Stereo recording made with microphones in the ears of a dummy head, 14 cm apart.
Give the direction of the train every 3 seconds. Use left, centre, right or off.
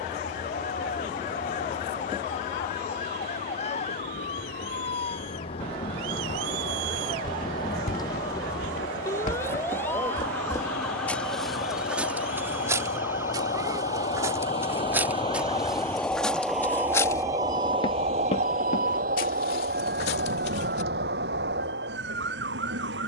left, left, left, left, left, centre, right, right.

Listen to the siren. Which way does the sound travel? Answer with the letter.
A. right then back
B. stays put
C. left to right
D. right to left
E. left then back
C.